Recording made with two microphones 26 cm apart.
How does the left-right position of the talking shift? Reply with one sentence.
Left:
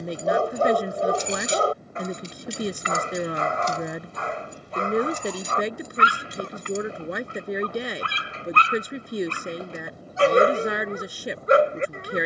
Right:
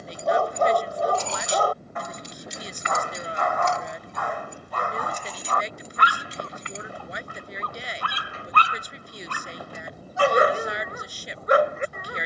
You can hear the talking stay put.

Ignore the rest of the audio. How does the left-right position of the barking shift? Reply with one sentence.
You can hear the barking stay in one place.